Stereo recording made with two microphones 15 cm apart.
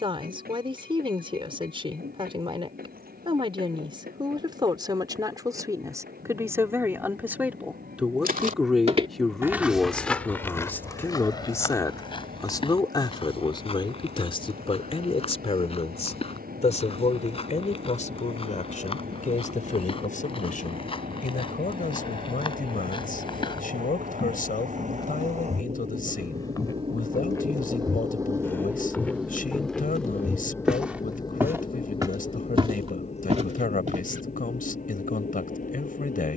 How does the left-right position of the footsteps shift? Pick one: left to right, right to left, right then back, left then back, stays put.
left then back.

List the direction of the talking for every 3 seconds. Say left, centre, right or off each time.
right, right, centre, centre, left, left, left, left, left, left, left, left.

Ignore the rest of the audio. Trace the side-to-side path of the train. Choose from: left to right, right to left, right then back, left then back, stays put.
right to left.